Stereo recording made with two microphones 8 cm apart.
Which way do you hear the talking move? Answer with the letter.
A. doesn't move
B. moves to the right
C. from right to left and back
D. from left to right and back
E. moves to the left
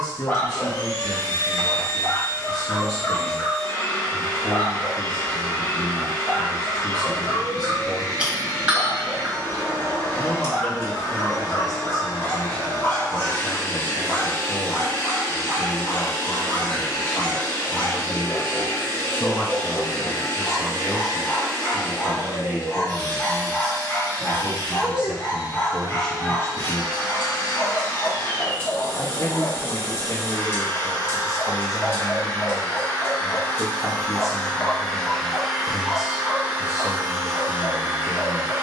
D.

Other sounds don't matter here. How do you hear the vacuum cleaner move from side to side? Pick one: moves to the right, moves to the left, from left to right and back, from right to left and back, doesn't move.
moves to the right.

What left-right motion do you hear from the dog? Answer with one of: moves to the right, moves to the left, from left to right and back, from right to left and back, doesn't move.
doesn't move.